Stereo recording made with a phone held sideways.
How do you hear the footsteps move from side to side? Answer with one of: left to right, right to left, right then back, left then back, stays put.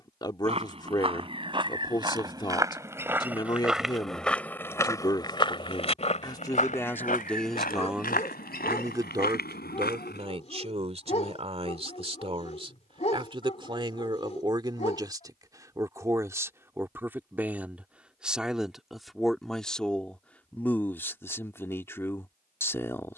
right to left.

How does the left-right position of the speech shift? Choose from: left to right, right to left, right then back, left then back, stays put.
right then back.